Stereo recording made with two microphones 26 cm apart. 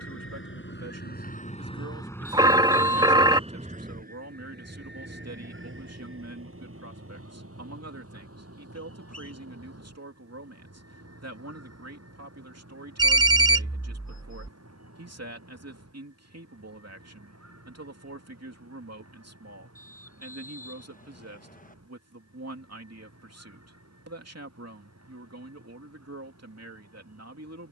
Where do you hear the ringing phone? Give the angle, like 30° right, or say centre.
20° right.